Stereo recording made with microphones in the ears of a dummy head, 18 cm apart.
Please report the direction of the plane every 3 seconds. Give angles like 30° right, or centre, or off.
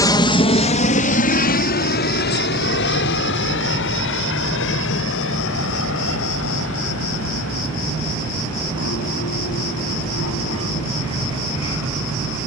40° left, 60° left, 70° left, 70° left.